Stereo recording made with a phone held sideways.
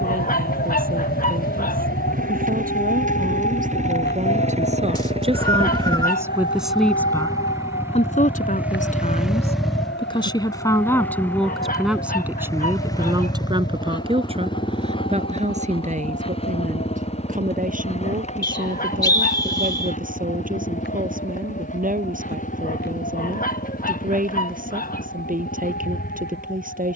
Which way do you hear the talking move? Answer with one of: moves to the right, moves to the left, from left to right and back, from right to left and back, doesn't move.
from right to left and back.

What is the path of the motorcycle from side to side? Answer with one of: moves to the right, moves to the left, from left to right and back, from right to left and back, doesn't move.
moves to the left.